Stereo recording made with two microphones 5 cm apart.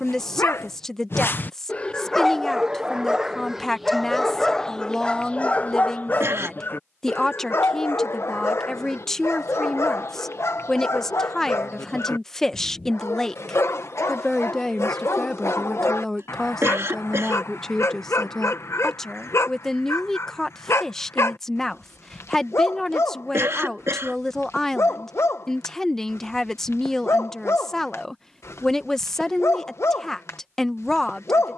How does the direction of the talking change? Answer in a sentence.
In this clip you hear the talking stay in one place.